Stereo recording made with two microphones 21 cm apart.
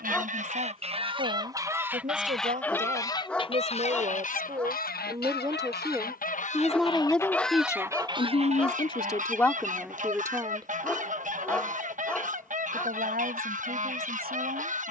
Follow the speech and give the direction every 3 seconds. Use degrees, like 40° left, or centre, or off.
40° right, 30° right, 10° left, centre, 50° right.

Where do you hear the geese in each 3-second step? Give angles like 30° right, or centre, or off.
20° right, 40° left, centre, 40° right, 40° right.